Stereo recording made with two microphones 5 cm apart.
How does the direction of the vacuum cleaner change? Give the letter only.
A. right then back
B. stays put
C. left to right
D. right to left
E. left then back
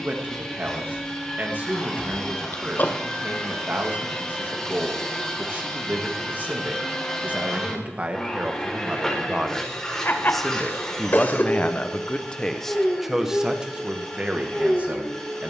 B.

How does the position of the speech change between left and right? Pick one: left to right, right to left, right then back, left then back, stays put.
left then back.